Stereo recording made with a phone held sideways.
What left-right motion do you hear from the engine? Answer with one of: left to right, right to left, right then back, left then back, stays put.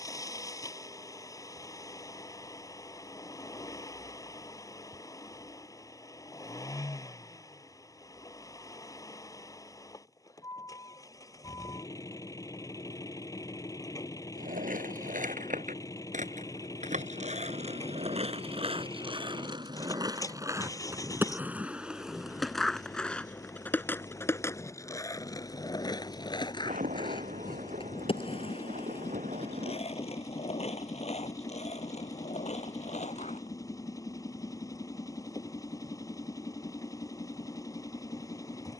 stays put.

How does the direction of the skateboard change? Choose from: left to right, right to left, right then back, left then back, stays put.
right to left.